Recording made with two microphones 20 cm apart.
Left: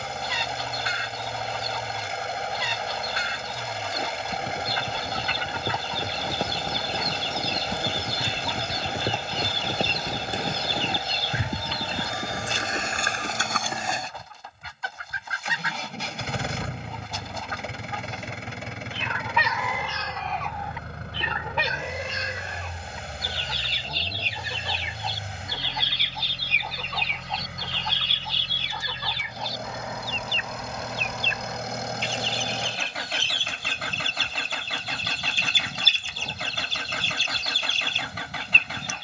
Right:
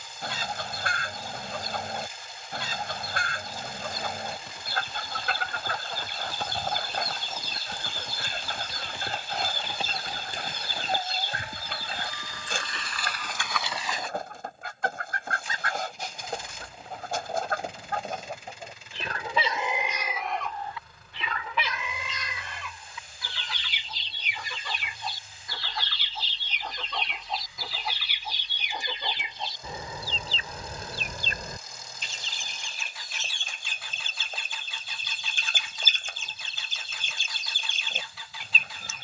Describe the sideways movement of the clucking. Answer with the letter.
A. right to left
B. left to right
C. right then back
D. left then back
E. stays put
D.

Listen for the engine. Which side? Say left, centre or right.
left.